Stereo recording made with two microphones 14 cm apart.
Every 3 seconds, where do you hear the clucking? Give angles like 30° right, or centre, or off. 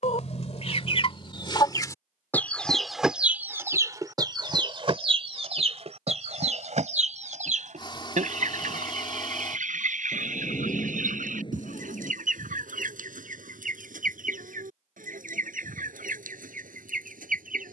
30° left, 30° right, 60° right, 70° right, 70° right, 80° right.